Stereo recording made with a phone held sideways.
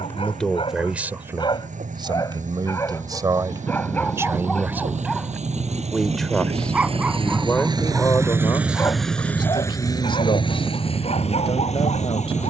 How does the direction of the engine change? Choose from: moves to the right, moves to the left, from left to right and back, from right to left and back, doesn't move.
moves to the left.